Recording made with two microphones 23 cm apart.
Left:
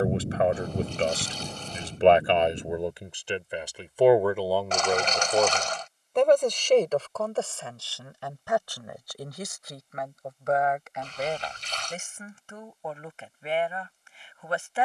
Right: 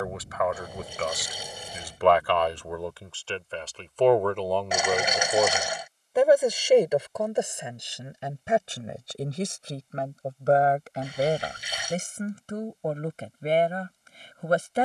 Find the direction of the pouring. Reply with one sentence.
You can hear the pouring in the centre.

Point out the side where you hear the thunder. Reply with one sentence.
You can hear the thunder on the left.